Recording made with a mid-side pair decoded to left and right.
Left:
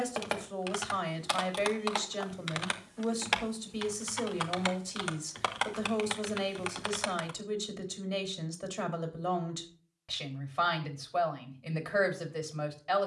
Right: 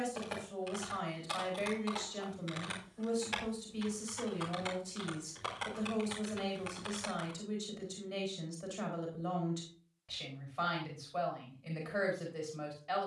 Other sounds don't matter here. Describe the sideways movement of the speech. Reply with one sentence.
In this clip you hear the speech stay put.